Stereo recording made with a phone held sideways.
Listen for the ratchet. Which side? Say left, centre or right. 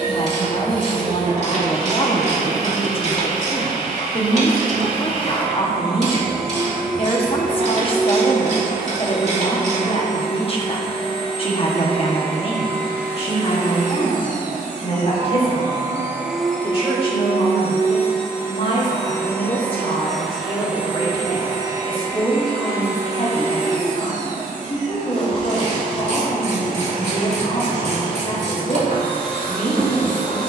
right.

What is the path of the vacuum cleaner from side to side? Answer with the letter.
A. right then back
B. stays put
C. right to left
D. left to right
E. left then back
E.